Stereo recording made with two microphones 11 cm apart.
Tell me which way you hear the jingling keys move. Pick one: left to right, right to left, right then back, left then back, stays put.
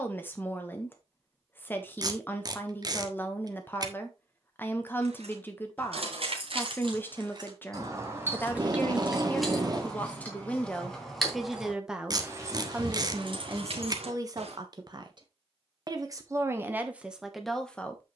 left then back.